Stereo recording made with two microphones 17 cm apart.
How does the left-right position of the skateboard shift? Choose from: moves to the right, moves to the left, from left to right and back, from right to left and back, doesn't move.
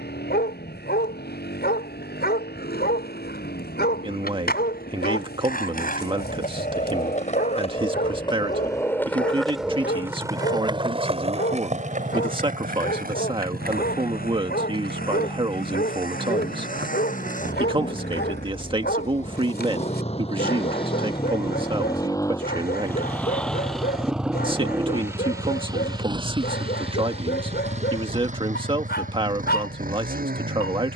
moves to the right.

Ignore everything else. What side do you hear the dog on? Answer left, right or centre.
left.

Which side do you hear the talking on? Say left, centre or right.
right.